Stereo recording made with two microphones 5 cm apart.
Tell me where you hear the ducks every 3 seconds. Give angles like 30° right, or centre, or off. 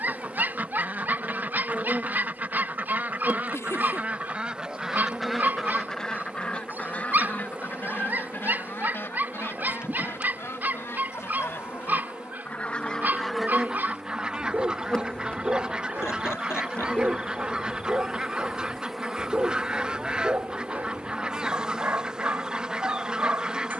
30° right, 10° right, 40° left, 50° left, centre, 20° right, 20° right, 20° right.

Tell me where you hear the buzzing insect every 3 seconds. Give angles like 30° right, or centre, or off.
20° right, 20° right, 20° right, 20° right, centre, 20° left, centre, 10° right.